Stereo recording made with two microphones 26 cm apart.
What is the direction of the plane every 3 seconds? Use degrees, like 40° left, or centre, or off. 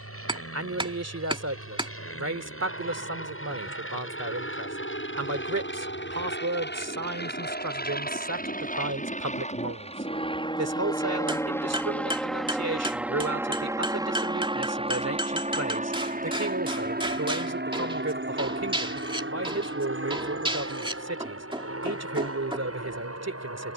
60° left, 50° left, 40° left, 20° left, 10° right, 30° right, 50° right, 60° right.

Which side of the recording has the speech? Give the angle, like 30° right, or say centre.
80° right.